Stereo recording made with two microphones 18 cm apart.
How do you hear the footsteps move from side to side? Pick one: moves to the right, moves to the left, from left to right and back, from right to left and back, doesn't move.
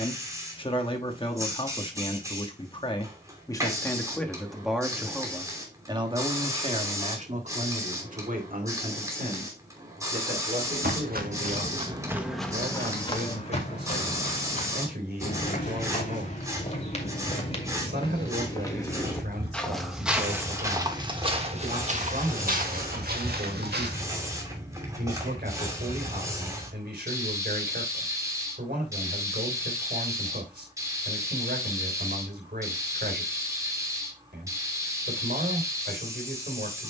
from right to left and back.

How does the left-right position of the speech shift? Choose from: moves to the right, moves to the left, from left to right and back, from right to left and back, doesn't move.
moves to the right.